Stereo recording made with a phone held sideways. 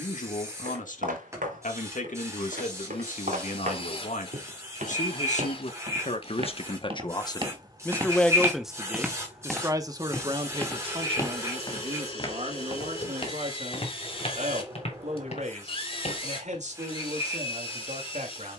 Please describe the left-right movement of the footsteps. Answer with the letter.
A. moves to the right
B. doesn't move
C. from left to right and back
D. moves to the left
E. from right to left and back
D.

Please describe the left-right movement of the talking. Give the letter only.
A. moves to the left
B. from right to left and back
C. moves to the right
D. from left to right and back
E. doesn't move
C.